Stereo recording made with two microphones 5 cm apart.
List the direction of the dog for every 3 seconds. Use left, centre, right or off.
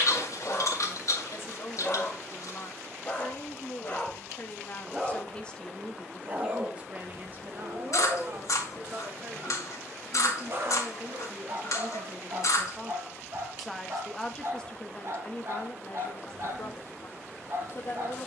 left, centre, right, right, right, right.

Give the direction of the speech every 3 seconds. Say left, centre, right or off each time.
left, left, right, right, centre, left.